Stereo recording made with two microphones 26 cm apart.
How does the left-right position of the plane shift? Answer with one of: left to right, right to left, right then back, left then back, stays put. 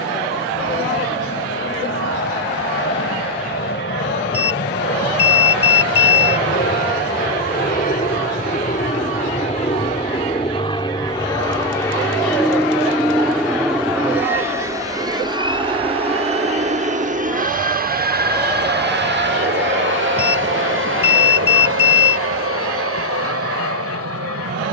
left to right.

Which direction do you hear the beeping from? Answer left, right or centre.
left.